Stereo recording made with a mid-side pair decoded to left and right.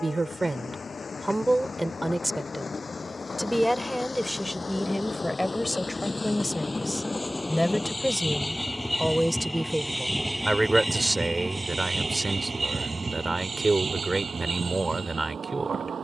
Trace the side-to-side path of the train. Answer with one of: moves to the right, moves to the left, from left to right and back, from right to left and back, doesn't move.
moves to the right.